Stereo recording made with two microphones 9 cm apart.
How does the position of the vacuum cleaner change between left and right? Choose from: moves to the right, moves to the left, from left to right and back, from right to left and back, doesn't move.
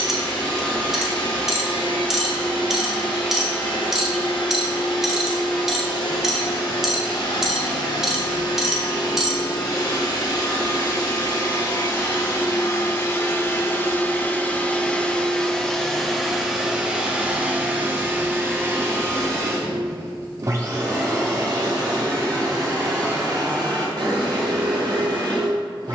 moves to the right.